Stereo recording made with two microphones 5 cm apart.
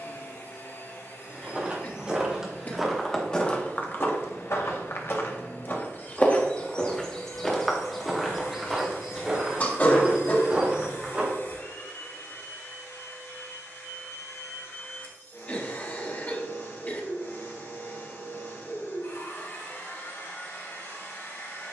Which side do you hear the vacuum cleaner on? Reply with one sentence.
In this clip you hear the vacuum cleaner on the left.